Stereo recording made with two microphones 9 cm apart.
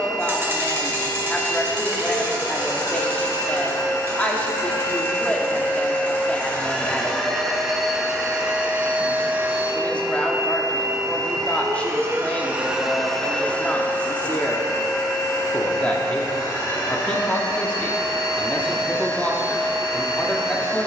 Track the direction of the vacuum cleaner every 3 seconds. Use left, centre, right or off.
left, left, centre, right, centre, left, left.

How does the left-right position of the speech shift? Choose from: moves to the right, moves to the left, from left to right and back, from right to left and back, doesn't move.
doesn't move.